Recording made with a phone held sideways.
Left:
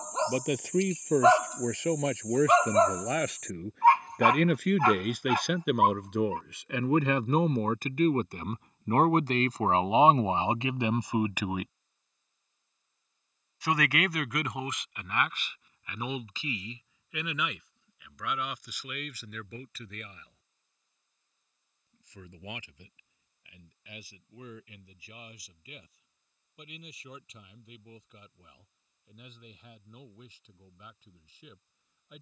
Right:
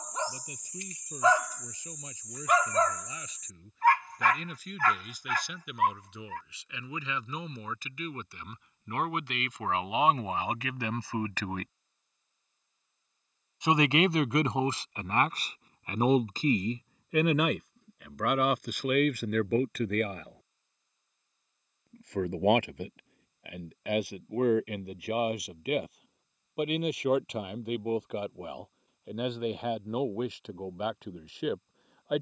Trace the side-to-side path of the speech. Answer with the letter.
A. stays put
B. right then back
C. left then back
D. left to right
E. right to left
D.